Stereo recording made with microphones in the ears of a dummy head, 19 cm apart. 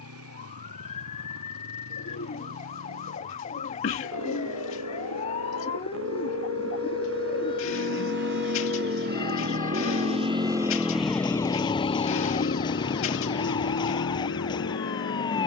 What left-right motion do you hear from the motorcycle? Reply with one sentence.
You can hear the motorcycle travel towards the left.